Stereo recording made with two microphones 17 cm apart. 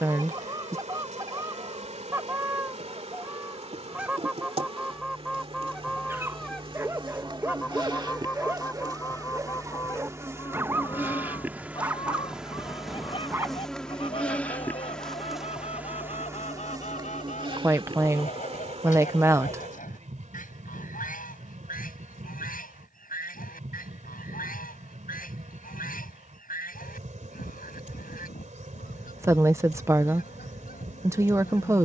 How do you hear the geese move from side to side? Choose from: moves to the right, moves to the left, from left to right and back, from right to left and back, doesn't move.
moves to the left.